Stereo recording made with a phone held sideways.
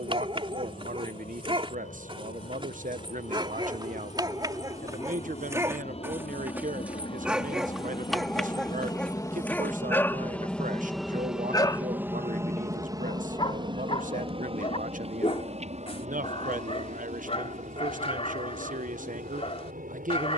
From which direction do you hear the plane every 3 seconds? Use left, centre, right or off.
left, left, left, centre, right, right, right.